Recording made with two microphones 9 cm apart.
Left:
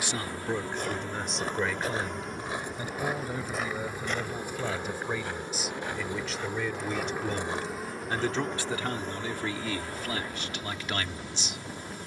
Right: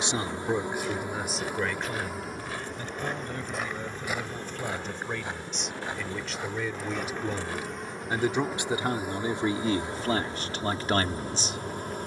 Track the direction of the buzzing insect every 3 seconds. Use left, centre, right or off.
centre, centre, centre, right.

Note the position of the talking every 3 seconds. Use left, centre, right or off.
centre, centre, centre, right.